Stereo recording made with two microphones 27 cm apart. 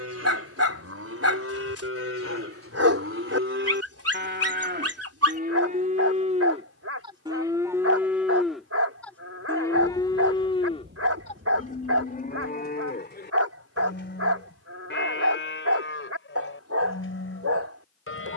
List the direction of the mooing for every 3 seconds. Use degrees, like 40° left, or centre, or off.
60° right, 40° right, 10° right, 20° left, 40° left, 50° left.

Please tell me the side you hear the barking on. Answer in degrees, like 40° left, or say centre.
70° right.